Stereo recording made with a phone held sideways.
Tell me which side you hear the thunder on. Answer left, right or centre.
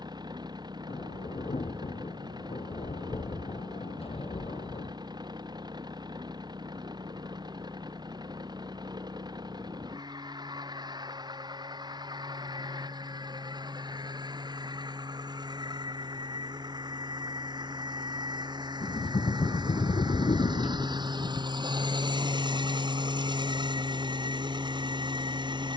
left.